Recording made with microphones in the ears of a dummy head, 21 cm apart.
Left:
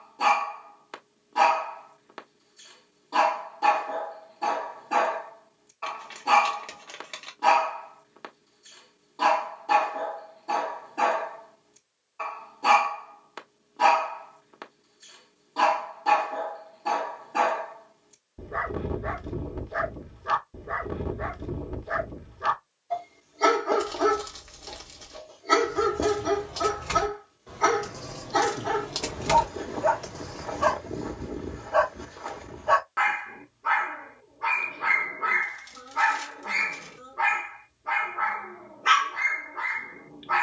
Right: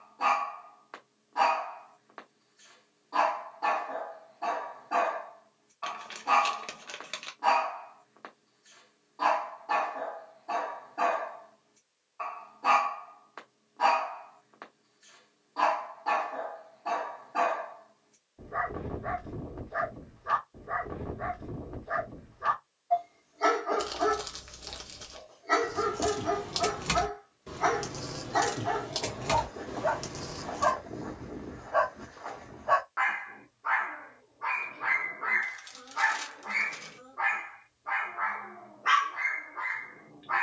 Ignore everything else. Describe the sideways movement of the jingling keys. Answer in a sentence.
In this clip you hear the jingling keys move from right to left and back again.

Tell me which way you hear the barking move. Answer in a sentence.
You can hear the barking stay in one place.